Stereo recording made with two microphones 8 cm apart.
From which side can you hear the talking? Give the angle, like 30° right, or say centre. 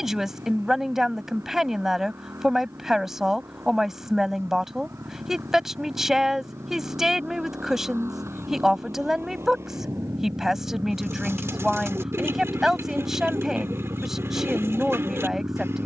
10° right.